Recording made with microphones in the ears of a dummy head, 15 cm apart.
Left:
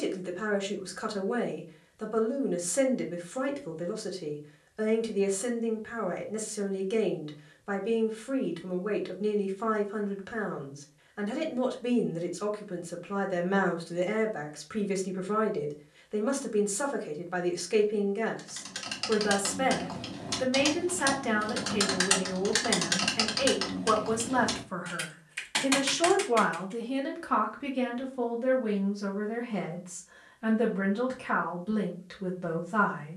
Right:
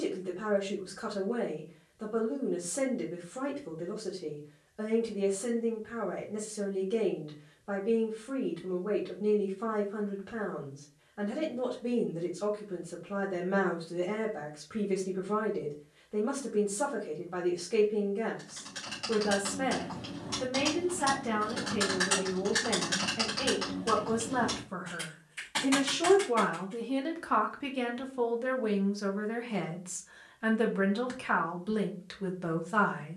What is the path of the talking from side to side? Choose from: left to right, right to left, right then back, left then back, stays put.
left to right.